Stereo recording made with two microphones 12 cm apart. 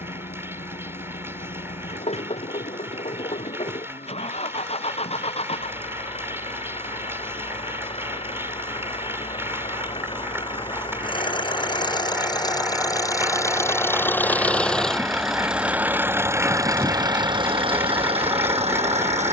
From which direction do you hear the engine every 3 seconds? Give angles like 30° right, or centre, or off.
60° left, 60° left, 50° left, 40° left, 20° left, 20° right, 60° right.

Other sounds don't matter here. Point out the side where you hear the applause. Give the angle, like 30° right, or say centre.
20° right.